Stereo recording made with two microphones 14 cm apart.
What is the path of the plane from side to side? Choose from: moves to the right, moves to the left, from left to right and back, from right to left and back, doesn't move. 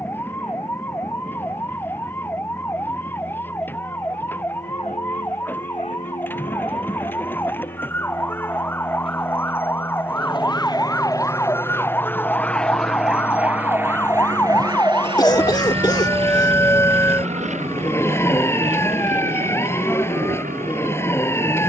moves to the right.